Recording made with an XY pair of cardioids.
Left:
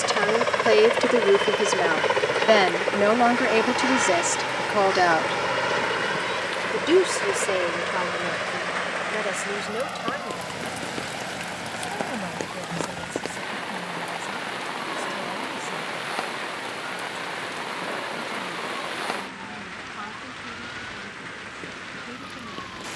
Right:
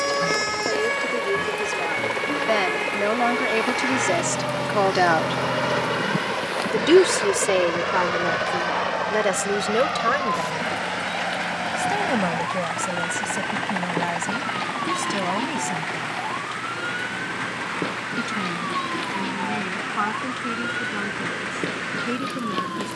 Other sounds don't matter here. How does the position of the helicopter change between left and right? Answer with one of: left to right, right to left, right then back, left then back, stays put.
left to right.